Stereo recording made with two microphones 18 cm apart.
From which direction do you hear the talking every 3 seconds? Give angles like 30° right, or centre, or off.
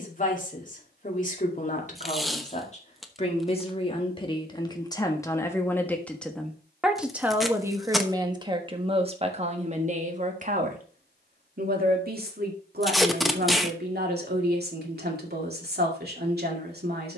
40° left, 20° left, 10° right, 50° right, 60° right, 60° right.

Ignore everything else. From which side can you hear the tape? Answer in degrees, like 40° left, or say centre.
centre.